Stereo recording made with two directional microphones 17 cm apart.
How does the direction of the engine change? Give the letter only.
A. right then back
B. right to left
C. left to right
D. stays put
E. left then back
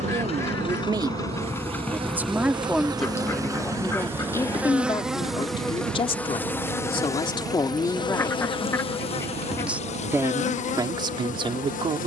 C.